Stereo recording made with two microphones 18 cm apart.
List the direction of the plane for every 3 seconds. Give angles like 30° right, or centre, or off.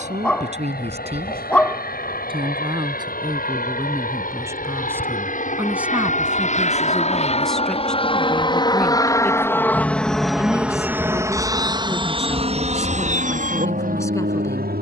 60° left, 50° left, 40° left, centre, 40° right.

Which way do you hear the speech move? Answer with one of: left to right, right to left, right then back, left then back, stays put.
right to left.